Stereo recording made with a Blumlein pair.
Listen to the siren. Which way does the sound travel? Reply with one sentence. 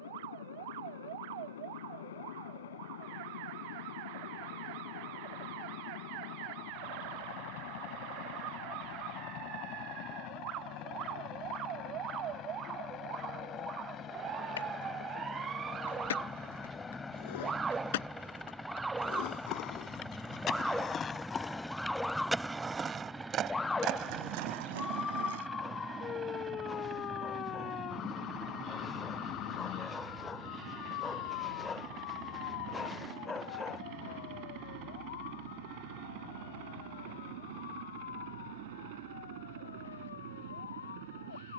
In this clip you hear the siren move from right to left.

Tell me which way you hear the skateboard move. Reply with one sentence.
In this clip you hear the skateboard move from left to right.